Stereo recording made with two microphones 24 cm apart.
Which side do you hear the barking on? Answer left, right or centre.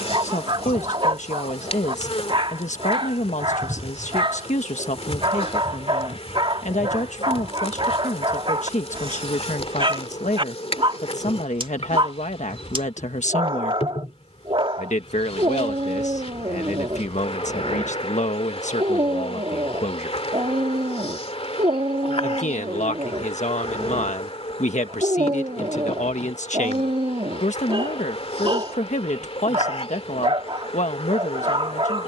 right.